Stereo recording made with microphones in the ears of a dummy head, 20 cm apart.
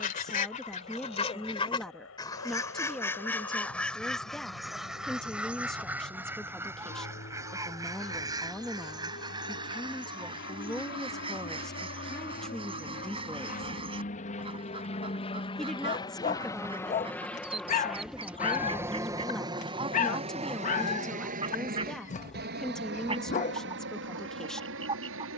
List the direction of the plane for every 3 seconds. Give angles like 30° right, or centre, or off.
70° left, 60° left, 60° left, 50° left, 40° left, 10° left, 20° right, 50° right, 60° right.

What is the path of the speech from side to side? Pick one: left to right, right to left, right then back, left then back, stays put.
stays put.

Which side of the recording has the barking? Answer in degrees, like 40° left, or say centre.
40° left.